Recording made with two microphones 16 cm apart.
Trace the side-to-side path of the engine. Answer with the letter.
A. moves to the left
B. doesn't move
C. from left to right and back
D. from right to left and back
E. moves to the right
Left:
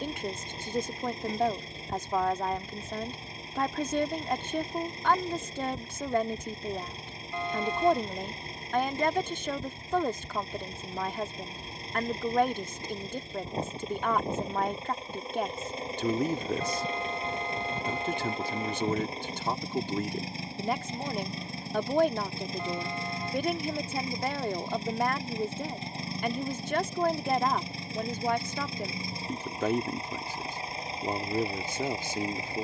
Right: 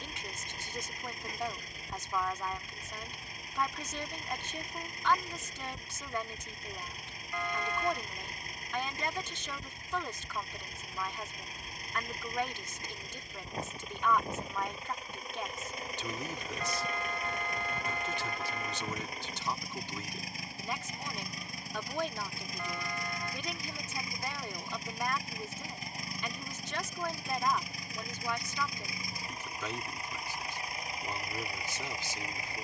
B.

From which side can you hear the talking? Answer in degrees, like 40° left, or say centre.
50° left.